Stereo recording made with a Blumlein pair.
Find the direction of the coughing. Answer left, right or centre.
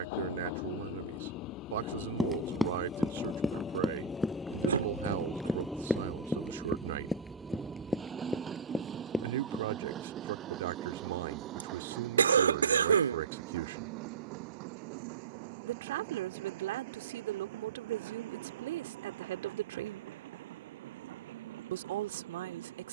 right.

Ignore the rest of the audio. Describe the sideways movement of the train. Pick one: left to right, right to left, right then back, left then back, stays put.
left to right.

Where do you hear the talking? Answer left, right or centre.
right.